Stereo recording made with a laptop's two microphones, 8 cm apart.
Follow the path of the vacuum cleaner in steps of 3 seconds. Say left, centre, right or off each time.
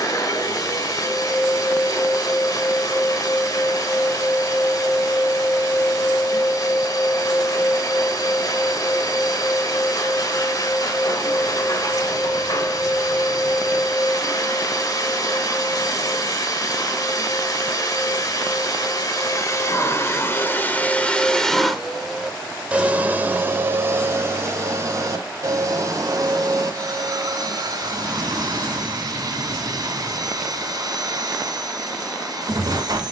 left, left, left, left, left, left, left, centre, right, right, right.